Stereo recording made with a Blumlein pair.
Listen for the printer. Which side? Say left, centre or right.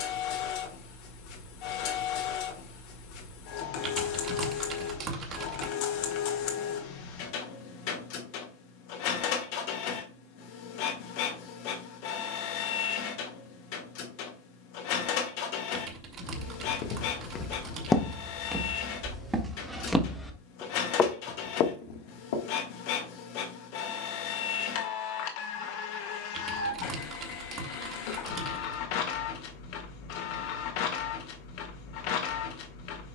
left.